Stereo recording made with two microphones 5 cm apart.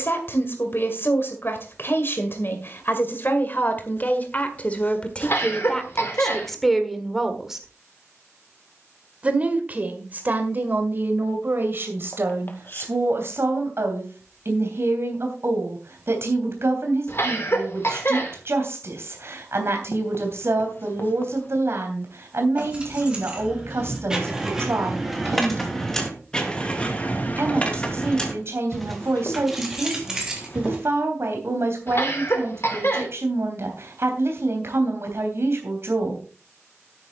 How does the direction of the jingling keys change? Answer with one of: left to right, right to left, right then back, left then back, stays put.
left then back.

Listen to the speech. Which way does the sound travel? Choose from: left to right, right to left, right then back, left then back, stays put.
left to right.